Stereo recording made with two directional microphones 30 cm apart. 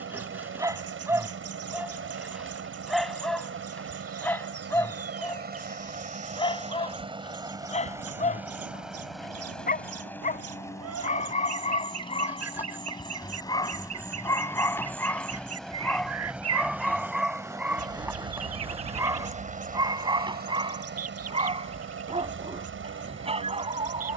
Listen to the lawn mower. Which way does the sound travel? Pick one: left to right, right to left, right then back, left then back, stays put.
left then back.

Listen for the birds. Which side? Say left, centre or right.
right.